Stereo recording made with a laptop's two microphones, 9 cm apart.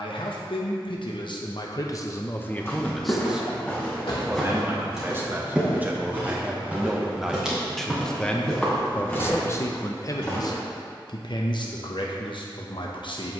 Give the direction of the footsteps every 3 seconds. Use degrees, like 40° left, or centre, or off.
30° left, centre, 10° right, 20° left, off.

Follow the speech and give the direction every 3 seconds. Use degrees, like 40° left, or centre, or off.
50° left, 20° right, centre, 40° left, 60° left.